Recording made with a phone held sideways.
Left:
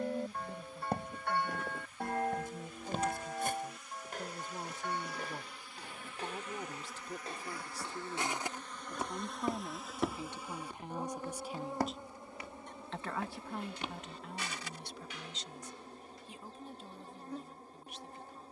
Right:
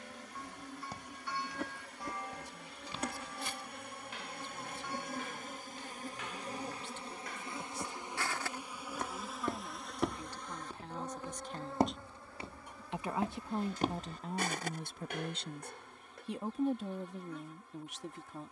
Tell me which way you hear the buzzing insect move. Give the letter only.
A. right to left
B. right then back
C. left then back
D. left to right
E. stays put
A.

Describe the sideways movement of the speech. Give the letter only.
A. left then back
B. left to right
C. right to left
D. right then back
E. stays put
B.